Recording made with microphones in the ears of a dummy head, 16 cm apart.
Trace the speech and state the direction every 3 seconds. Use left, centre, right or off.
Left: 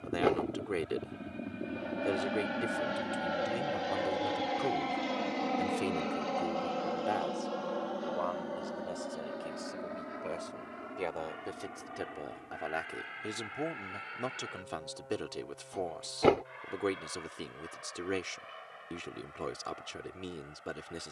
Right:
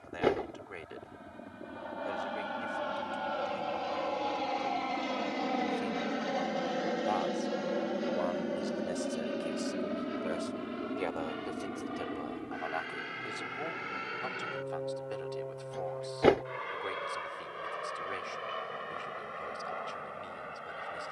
left, left, centre, centre, left, left, left.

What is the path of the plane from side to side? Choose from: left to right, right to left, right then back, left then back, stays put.
left to right.